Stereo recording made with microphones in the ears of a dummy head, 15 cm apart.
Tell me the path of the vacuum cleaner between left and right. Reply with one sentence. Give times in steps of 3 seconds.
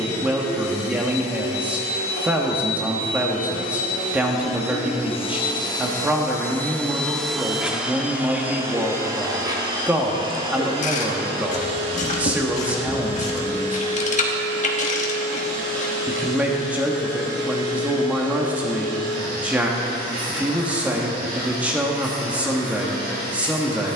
In this clip you hear the vacuum cleaner on the left from 0 s, in the centre from 6 s and on the right from 9 s.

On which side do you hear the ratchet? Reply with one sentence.
You can hear the ratchet on the left.